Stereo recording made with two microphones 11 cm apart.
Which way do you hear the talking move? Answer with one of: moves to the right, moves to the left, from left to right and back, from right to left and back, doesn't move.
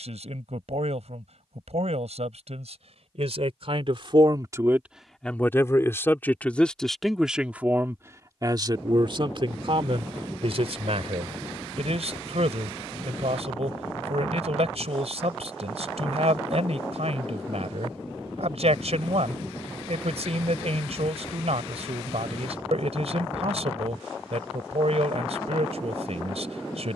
from right to left and back.